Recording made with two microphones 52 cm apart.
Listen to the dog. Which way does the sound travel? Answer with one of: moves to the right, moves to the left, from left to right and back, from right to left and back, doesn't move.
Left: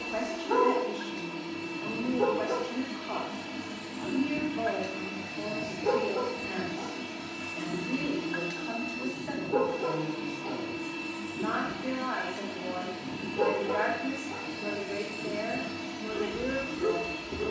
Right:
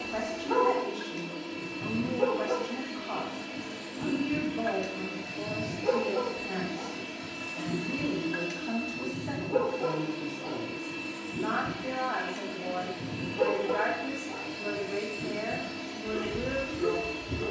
doesn't move.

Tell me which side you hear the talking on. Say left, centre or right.
right.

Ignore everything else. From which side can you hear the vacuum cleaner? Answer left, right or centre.
left.